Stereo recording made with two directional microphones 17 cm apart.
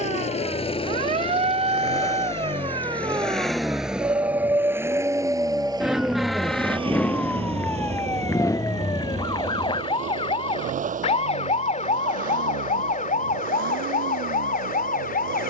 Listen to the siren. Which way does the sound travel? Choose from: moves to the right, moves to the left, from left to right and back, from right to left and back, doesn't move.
moves to the left.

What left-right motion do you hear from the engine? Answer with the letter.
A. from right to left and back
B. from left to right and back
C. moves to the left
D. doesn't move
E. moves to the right
E.